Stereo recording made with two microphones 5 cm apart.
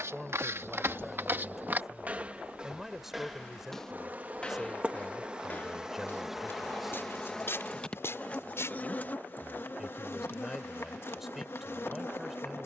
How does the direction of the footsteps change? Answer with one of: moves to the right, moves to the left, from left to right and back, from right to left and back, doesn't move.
moves to the left.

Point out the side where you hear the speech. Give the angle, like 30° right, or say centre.
10° right.